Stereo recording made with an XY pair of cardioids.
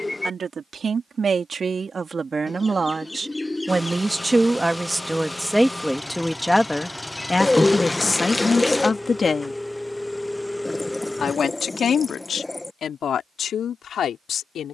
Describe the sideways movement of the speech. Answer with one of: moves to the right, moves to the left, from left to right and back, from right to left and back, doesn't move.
moves to the left.